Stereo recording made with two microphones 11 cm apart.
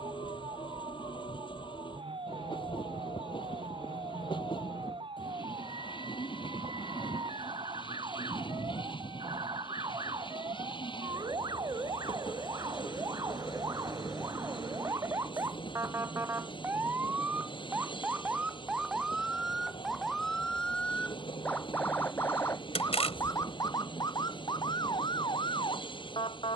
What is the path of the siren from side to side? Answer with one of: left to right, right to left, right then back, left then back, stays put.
right to left.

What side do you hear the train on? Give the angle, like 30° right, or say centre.
50° left.